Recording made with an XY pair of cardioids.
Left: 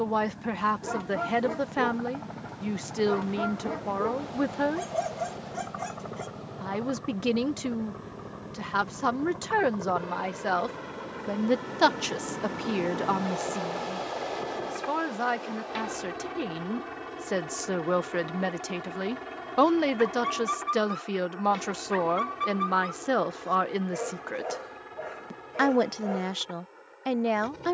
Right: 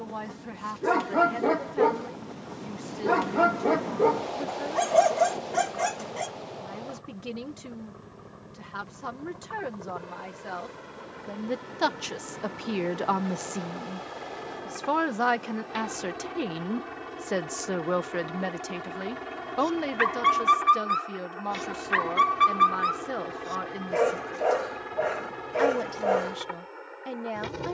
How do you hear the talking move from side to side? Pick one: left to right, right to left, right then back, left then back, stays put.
right then back.